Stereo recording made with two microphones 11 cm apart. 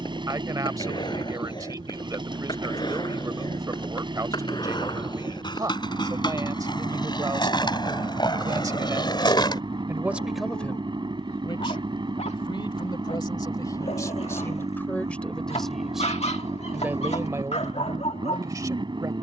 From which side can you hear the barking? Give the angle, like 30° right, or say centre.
70° left.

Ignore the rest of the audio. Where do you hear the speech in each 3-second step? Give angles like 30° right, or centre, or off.
30° right, 30° right, 30° right, 10° left, 30° left, 10° right, 30° right.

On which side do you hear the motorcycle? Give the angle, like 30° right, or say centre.
40° right.